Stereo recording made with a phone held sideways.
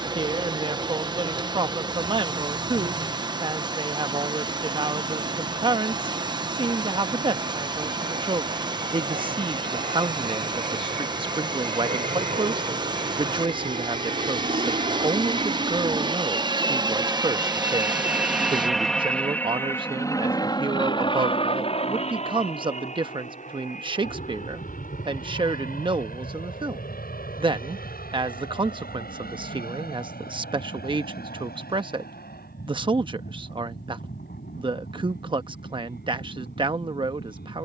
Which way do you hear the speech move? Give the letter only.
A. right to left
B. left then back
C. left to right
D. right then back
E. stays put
E.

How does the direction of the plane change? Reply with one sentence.
You can hear the plane travel towards the left.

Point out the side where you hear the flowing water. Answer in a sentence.
You can hear the flowing water on the right.